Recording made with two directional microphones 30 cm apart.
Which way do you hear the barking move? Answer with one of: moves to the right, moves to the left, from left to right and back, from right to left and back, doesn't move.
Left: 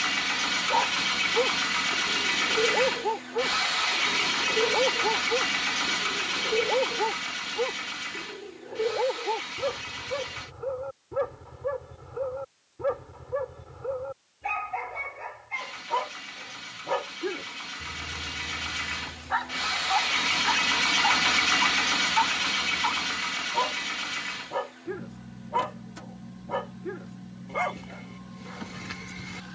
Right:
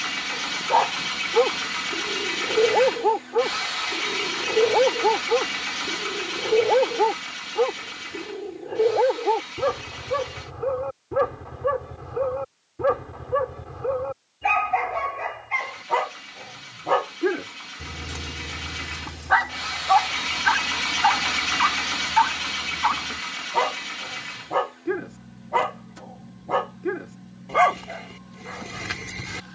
doesn't move.